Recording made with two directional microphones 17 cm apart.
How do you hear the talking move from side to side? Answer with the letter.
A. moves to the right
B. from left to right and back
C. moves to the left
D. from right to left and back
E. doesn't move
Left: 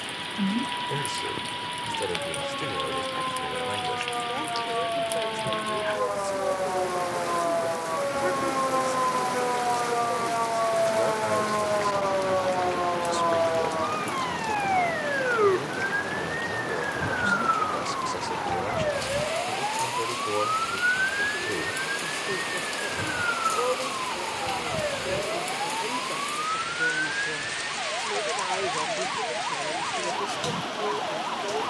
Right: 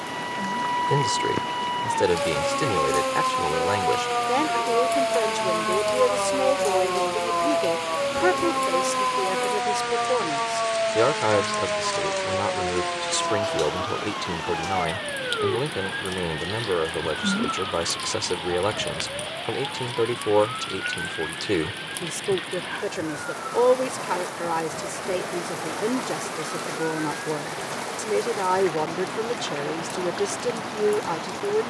E.